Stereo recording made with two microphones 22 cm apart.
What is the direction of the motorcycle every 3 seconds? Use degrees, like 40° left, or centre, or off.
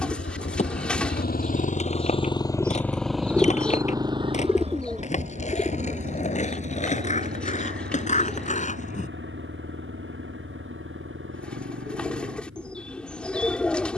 40° left, 20° right, 50° right, 60° right, 60° right.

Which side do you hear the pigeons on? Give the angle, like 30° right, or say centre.
centre.